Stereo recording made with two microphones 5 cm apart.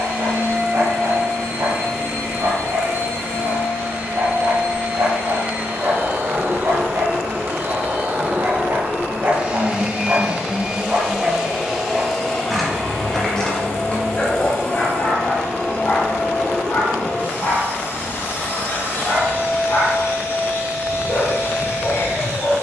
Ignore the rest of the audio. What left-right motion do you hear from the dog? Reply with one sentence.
In this clip you hear the dog move to the left.